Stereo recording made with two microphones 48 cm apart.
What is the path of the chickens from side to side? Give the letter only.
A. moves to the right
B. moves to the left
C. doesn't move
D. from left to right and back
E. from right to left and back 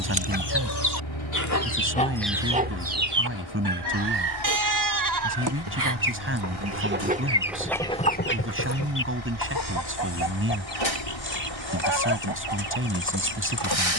D.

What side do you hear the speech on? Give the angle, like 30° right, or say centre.
30° right.